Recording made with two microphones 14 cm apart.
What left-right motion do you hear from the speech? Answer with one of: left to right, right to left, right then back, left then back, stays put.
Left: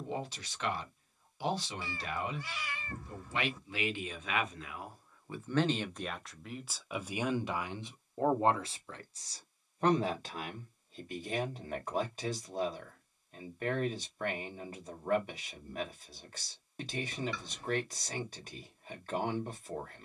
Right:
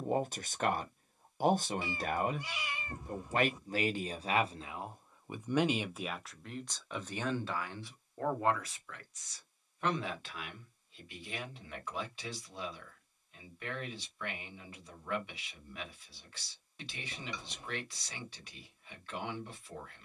right to left.